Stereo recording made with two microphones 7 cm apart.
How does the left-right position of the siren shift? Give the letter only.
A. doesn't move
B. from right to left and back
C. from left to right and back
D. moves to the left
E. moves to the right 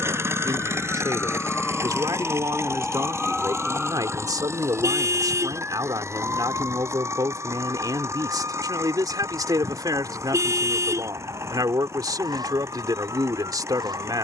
E.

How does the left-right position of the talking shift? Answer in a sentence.
In this clip you hear the talking stay put.